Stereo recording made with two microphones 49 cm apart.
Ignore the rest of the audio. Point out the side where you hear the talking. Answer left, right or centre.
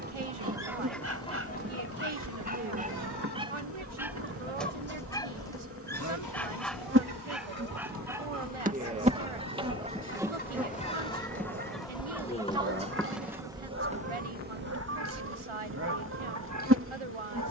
right.